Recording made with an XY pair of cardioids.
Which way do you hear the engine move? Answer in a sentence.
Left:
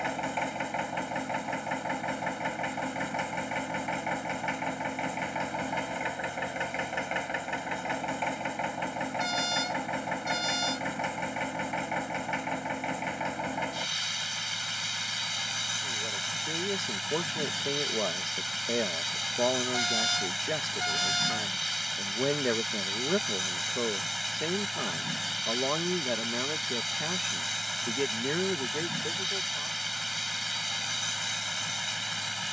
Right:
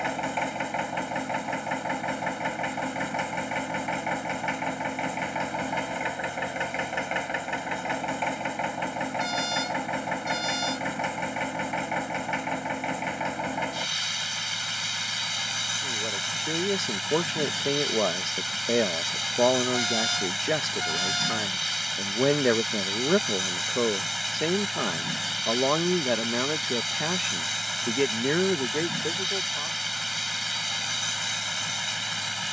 In this clip you hear the engine stay in one place.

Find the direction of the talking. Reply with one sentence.
In this clip you hear the talking on the right.